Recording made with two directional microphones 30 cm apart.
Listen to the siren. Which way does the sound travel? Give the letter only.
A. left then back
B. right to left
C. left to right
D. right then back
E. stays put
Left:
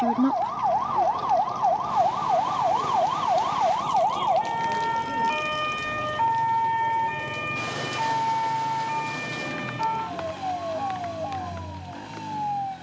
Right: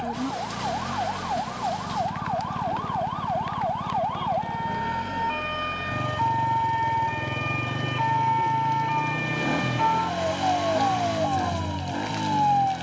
C.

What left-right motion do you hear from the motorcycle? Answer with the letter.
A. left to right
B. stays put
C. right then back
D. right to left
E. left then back
B.